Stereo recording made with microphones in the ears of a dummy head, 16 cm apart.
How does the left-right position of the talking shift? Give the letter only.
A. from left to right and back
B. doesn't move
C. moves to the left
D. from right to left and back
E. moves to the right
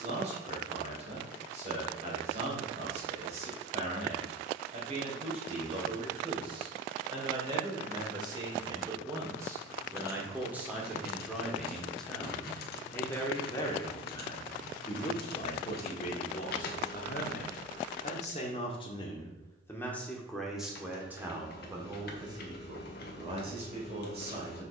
D.